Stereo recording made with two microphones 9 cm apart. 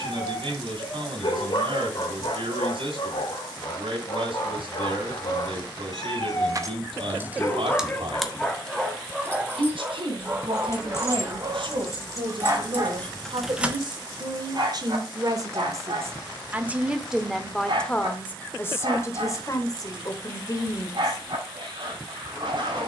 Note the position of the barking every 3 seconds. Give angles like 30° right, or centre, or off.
70° left, 60° left, 20° left, 20° right, 50° right, 60° right, 60° right, 60° right.